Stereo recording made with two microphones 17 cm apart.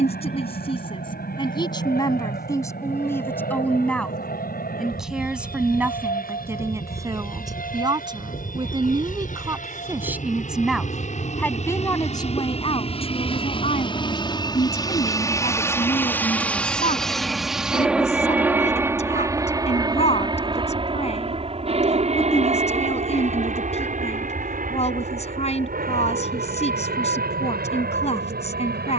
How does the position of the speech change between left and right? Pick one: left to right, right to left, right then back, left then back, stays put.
right then back.